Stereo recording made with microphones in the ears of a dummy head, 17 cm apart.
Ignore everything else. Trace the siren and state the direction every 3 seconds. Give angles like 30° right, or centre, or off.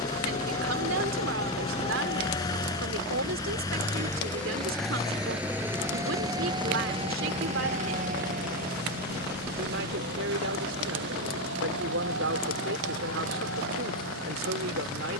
30° left, 10° left, 30° right, 60° right, 70° right.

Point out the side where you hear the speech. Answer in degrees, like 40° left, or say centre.
70° right.